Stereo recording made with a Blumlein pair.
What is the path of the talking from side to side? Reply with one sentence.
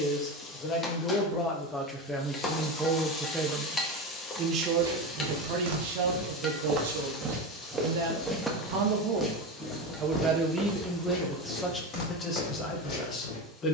You can hear the talking move from left to right and back again.